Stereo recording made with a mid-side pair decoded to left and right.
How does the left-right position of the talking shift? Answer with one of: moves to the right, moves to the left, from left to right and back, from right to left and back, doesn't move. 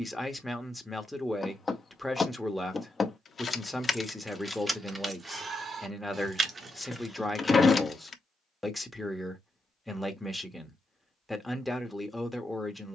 doesn't move.